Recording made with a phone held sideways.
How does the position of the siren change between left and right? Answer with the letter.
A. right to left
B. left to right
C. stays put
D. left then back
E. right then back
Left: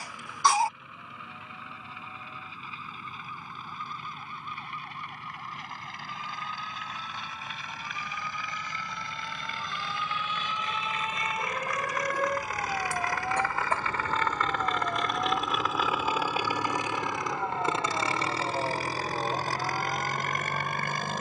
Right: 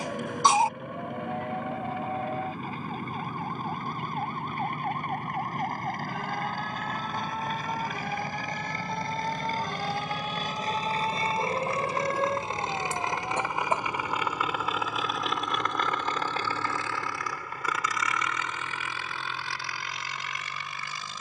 A.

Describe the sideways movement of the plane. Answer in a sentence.
In this clip you hear the plane move to the left.